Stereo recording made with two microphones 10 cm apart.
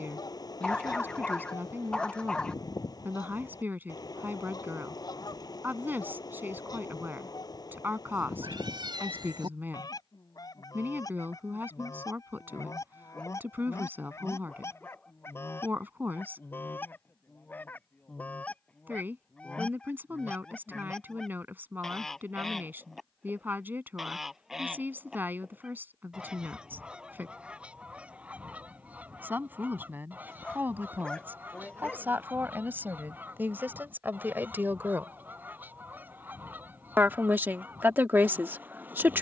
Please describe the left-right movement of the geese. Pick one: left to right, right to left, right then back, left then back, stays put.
left to right.